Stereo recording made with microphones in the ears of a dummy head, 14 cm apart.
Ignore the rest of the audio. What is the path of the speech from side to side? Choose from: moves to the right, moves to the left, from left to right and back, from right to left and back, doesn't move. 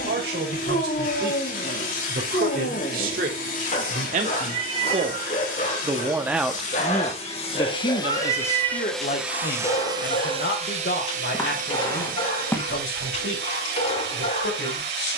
moves to the left.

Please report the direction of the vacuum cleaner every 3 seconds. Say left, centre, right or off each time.
left, left, left, right, right.